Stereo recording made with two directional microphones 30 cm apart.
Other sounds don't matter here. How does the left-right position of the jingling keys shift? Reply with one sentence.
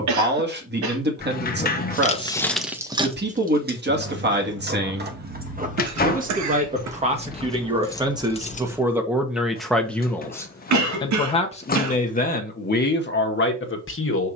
In this clip you hear the jingling keys go right and come back.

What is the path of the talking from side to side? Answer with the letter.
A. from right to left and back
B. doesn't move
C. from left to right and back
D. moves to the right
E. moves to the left
E.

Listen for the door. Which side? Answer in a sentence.
In this clip you hear the door on the left.